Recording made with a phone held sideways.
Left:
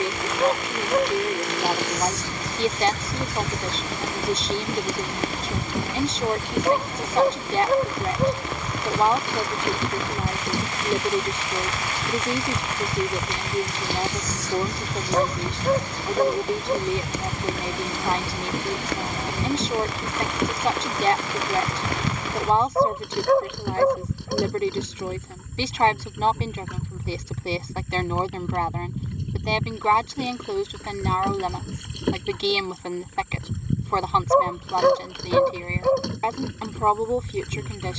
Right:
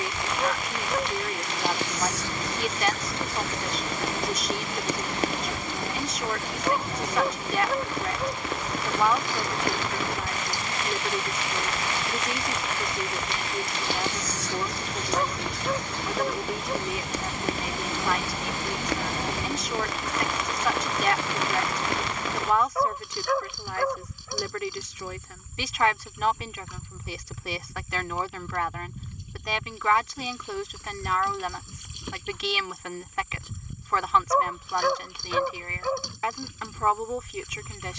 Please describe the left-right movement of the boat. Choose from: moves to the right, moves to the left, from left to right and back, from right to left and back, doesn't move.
doesn't move.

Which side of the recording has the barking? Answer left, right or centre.
left.